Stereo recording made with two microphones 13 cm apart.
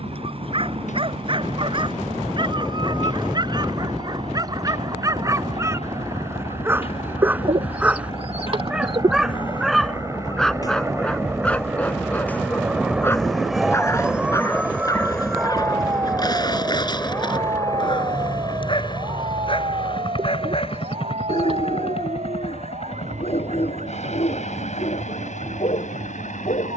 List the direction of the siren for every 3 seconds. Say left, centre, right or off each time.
left, left, left, left, centre, right, right, right, right.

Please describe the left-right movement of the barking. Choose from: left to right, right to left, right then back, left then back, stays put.
right to left.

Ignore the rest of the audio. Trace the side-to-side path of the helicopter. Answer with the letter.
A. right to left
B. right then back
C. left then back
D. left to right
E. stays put
A.